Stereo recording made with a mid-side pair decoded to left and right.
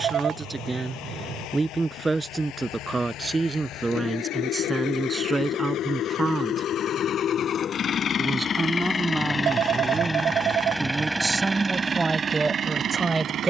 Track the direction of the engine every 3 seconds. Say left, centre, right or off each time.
left, left, left, centre, right.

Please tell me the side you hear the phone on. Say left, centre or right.
right.